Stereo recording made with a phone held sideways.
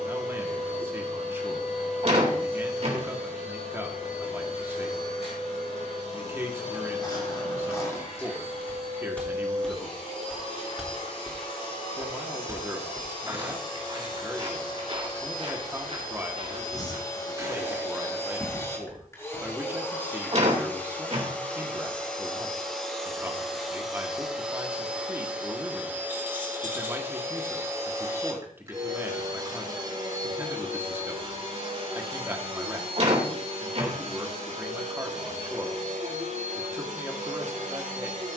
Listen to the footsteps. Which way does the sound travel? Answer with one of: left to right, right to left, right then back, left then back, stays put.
right then back.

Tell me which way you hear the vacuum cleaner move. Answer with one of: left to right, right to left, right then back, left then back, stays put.
left to right.